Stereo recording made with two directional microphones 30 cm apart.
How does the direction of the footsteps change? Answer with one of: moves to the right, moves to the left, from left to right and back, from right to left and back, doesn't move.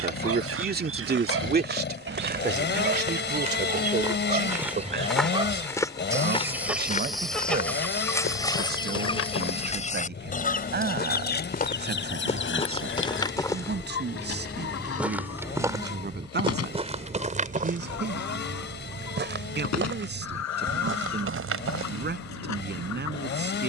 from right to left and back.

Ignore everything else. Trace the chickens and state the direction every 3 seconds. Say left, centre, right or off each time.
right, right, centre, left, left, left, left, left.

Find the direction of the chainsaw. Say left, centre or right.
left.